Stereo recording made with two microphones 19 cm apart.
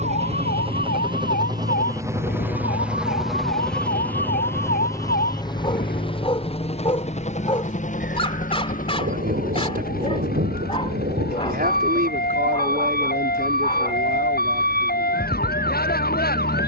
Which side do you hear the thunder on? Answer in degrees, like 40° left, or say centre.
60° right.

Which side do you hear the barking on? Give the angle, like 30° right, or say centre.
30° left.